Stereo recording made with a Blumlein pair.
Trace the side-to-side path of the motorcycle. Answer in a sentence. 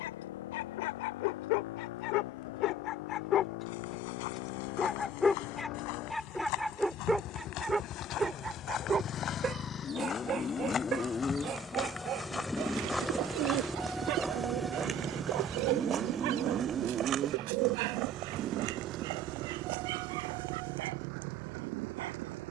In this clip you hear the motorcycle move from left to right.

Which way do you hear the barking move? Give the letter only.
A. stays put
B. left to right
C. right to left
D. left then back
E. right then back
B.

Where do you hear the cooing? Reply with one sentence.
You can hear the cooing on the right.